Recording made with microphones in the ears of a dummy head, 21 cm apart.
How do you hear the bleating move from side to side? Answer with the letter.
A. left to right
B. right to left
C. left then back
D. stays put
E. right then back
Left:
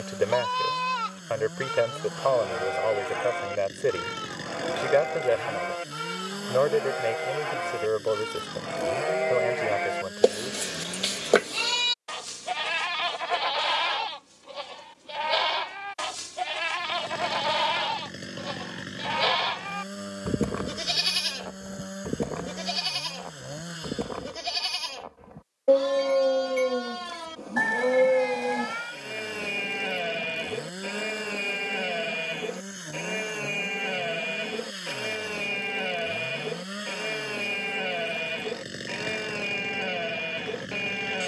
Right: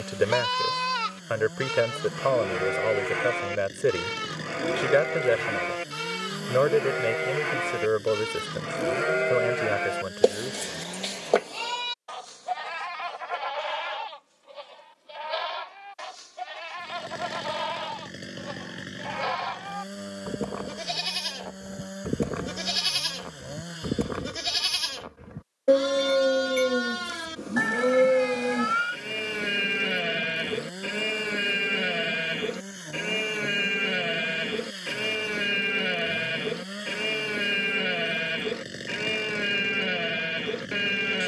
C.